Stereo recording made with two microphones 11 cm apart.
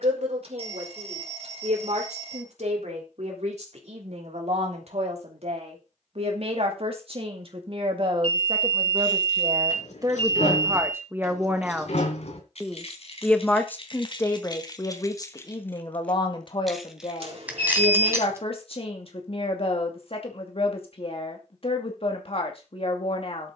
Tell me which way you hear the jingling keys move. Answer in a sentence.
You can hear the jingling keys move from left to right.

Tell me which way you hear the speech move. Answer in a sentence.
You can hear the speech go from the right side to the left.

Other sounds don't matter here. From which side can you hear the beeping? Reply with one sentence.
You can hear the beeping on the right.